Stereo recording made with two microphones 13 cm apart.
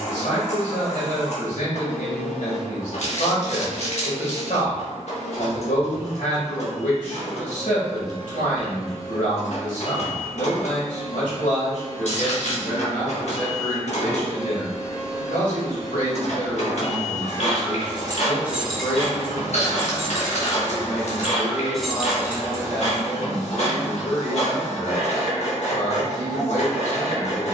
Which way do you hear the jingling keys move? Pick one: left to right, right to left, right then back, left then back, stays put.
left then back.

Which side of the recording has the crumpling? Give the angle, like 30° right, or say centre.
60° left.